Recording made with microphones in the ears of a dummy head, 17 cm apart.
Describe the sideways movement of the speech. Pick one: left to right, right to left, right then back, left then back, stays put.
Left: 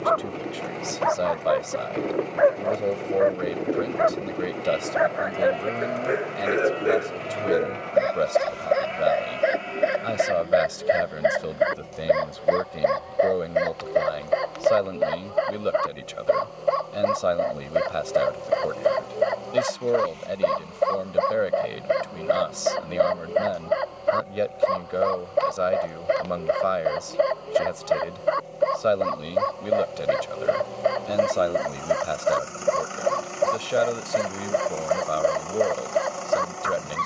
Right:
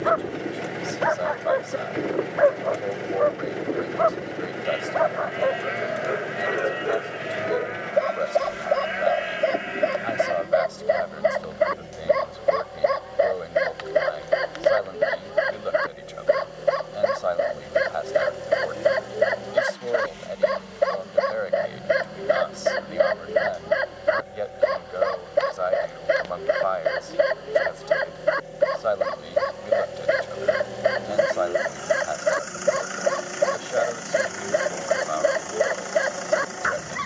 stays put.